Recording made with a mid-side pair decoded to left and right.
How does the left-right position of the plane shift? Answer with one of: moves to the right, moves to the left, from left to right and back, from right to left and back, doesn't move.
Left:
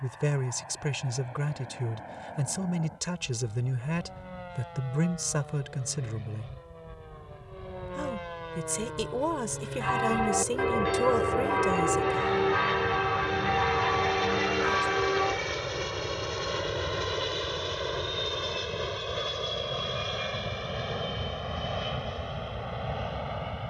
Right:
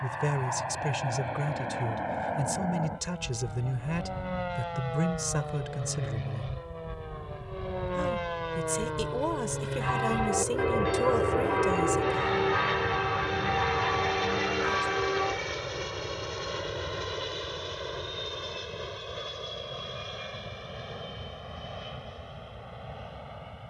moves to the left.